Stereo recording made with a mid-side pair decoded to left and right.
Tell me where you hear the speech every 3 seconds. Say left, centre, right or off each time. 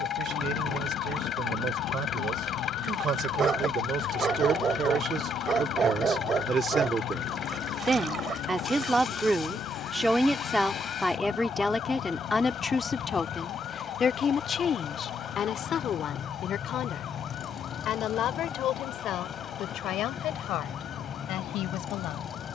right, right, right, centre, left, left, left, left.